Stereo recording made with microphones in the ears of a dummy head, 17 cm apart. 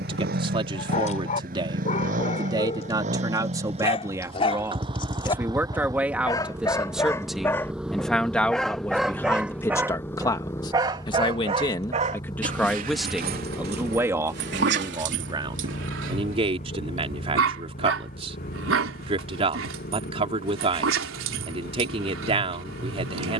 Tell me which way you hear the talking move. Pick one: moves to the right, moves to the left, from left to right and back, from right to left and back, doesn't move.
from right to left and back.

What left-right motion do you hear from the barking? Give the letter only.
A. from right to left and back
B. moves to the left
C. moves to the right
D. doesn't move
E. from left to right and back
C.